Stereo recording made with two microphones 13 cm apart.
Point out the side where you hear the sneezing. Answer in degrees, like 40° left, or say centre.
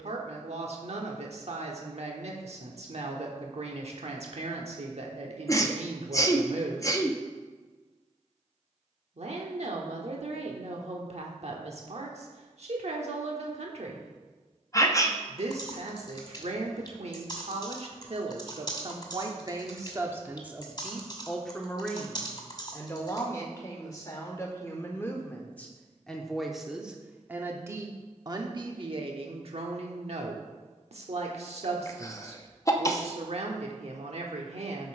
30° left.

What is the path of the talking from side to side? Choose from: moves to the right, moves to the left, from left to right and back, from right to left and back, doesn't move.
from right to left and back.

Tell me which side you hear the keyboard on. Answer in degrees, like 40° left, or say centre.
30° left.